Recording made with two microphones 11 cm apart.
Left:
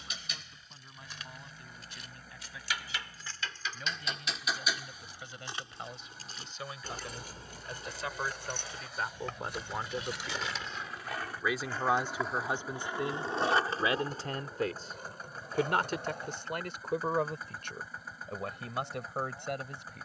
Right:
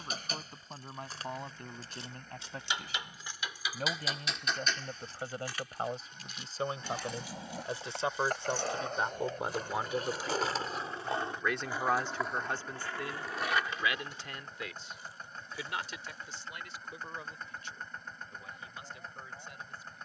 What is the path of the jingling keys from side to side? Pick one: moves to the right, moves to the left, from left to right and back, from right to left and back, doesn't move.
moves to the left.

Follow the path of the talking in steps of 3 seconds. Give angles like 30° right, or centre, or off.
50° right, 40° right, 30° right, 10° right, 30° left, 60° left, 70° left.